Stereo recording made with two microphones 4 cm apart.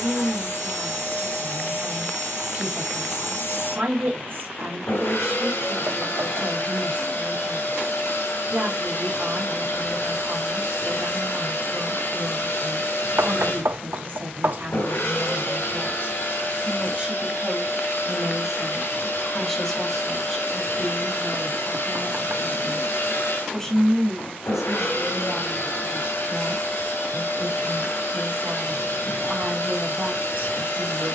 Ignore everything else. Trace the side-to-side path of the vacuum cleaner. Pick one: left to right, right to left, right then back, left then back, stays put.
stays put.